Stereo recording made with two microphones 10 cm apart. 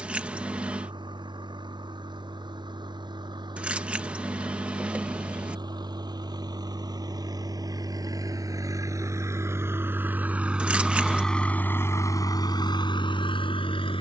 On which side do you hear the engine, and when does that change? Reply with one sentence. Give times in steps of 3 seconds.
In this clip you hear the engine on the right from 0 s, in the centre from 9 s and on the left from 12 s.